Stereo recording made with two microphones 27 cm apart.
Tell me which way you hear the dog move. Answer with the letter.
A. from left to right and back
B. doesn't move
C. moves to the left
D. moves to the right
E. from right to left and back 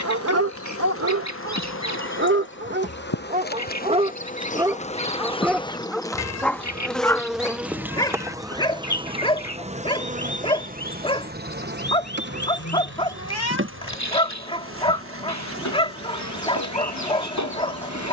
C.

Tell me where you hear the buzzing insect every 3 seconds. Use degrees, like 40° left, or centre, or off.
50° left, 30° left, centre, 30° right, 50° right, 60° right.